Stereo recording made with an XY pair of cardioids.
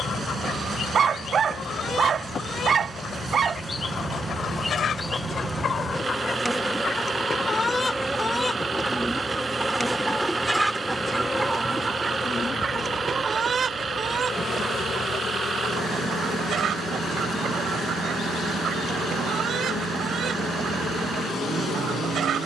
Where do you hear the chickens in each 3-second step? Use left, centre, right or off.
left, left, left, centre, right, right, right, right.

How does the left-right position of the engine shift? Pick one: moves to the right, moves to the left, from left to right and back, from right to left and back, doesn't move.
doesn't move.